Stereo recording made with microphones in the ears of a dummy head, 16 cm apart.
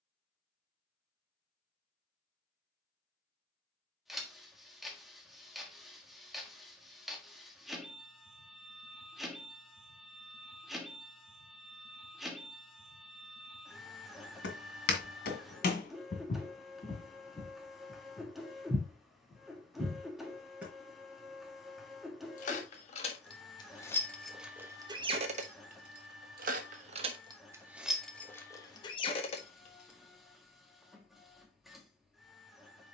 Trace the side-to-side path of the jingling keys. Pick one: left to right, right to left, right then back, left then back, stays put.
right then back.